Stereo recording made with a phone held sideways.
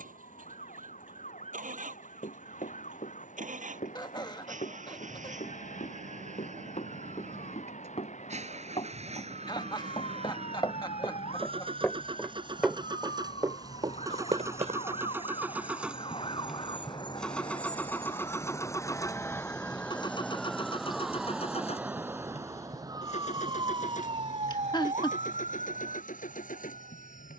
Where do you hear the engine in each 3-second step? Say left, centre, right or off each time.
right, right, right, right, right, centre, left, left, left.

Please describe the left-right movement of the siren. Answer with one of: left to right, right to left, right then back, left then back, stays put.
left to right.